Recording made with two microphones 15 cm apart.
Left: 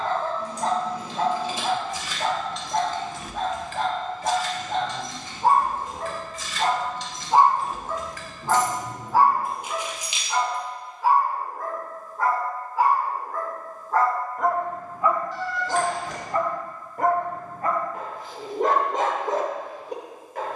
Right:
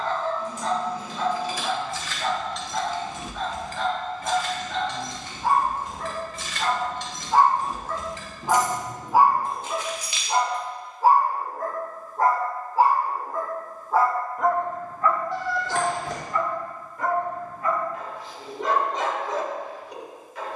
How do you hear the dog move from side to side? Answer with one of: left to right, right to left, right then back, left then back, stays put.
right then back.